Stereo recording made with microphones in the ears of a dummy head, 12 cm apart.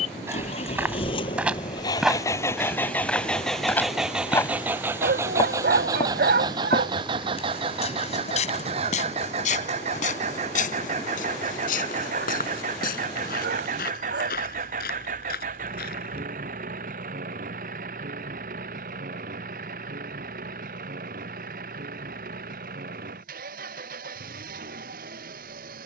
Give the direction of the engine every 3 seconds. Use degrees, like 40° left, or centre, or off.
30° left, 10° right, 40° right, 50° right, 60° right, 60° right, 60° right, 60° right, 70° right.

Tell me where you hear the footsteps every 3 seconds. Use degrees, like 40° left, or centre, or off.
10° right, 10° left, 50° left, 60° left, 70° left, 80° left, off, off, off.